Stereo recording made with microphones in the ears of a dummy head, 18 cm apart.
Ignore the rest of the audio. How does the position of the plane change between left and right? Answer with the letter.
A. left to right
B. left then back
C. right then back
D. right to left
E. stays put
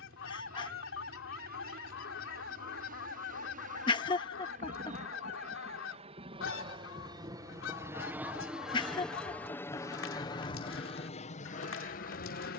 D.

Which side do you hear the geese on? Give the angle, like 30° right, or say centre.
70° left.